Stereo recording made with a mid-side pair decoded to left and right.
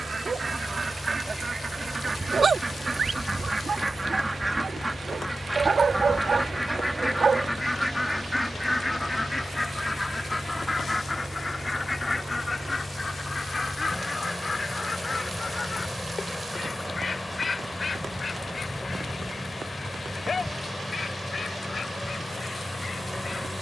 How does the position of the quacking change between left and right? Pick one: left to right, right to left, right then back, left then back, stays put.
right to left.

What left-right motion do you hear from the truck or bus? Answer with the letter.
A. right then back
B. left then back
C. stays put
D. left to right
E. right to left
C.